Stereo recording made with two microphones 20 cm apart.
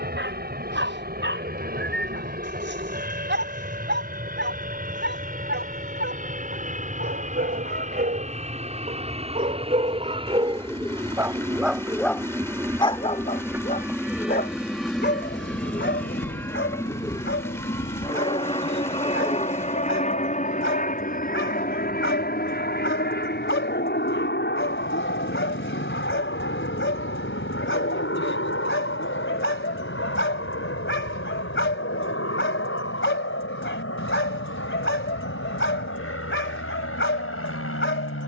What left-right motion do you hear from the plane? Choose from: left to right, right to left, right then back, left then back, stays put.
right to left.